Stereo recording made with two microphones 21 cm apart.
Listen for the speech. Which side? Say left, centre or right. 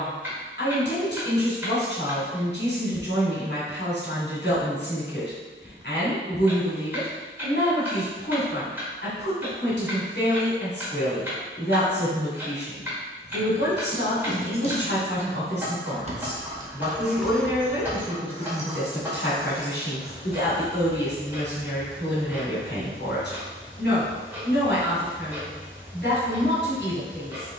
left.